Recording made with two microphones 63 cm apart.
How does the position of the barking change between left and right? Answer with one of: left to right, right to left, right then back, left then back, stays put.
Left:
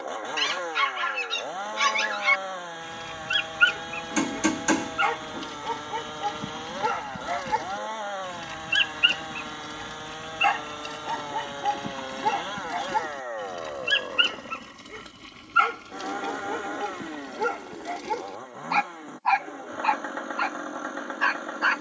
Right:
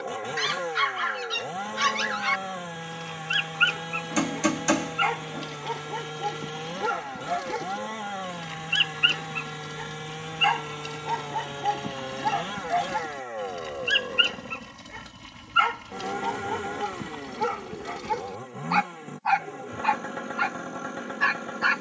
left to right.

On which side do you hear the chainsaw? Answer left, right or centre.
right.